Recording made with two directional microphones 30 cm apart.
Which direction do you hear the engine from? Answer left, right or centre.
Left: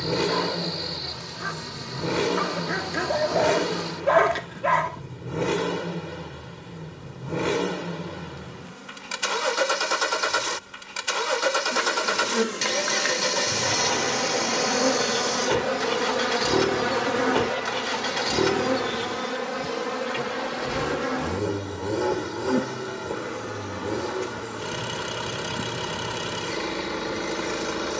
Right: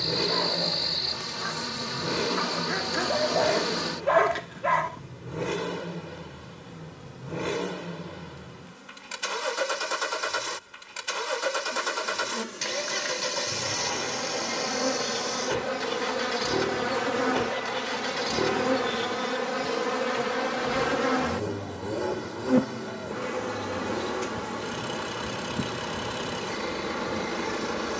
left.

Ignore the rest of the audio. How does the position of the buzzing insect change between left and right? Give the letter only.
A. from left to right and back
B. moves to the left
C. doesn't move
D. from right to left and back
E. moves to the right
D.